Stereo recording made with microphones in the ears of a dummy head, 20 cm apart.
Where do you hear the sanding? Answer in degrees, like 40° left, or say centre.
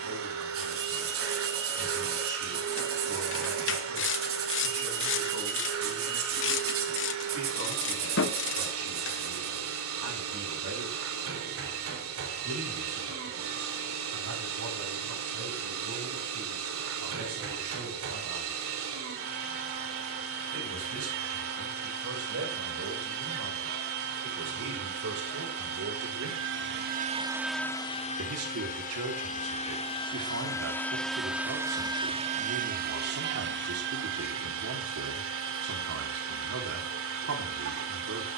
60° right.